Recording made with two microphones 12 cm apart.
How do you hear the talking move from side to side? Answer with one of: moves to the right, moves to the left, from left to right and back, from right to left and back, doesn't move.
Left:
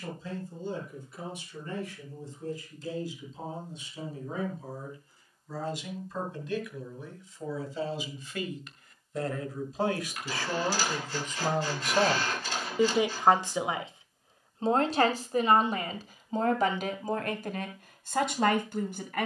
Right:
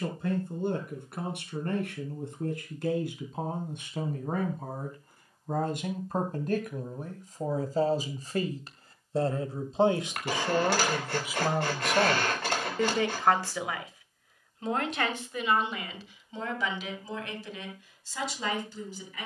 moves to the left.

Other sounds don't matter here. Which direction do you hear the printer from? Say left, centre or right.
right.